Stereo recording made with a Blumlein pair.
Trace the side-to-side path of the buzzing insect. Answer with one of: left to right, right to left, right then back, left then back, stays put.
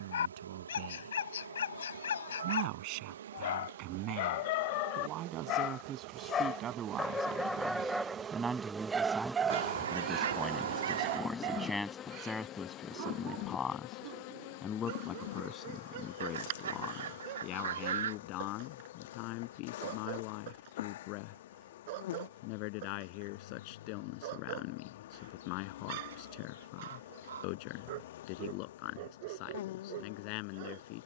right to left.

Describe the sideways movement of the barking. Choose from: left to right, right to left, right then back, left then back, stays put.
left to right.